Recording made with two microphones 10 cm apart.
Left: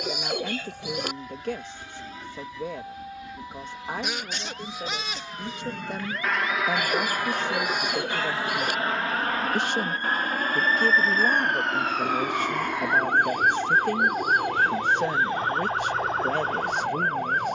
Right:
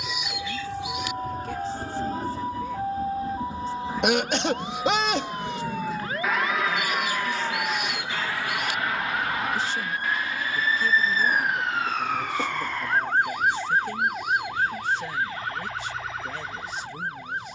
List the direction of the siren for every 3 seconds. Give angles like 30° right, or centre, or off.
50° right, 40° right, 30° right, 10° right, 20° left, 40° left.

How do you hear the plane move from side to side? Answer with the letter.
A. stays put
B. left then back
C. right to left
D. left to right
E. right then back
C.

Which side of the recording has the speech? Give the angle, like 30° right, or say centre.
70° left.